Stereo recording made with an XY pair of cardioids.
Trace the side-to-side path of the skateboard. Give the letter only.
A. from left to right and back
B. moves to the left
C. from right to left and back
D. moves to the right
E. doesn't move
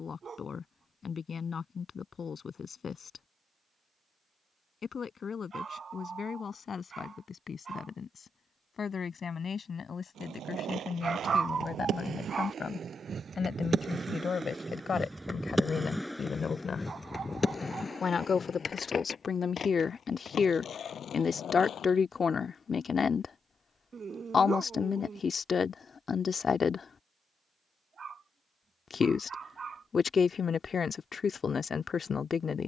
B.